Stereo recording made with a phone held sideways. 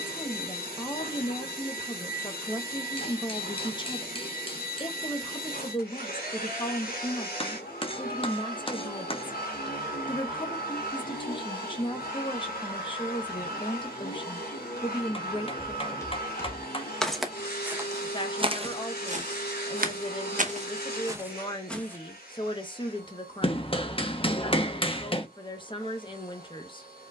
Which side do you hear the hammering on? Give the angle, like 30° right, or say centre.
40° left.